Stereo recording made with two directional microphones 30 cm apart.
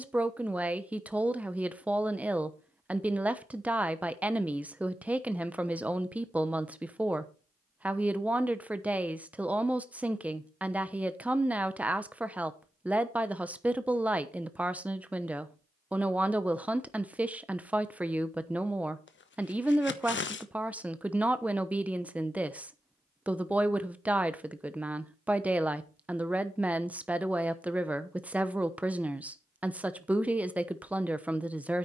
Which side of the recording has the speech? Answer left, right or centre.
centre.